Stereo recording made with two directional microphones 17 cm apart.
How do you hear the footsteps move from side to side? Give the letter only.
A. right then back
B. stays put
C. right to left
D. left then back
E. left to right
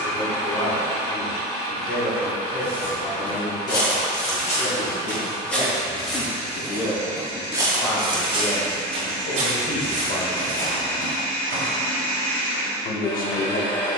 E.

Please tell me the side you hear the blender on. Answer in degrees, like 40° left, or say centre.
20° left.